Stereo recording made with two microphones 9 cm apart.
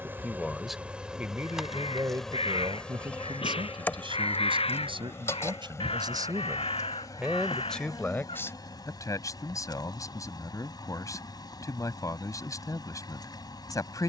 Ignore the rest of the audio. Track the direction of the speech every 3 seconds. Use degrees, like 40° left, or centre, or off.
20° right, 60° right, 10° right, 40° left, 40° left.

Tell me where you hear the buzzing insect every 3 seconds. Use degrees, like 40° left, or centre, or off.
centre, 20° left, 40° left, 50° left, 50° left.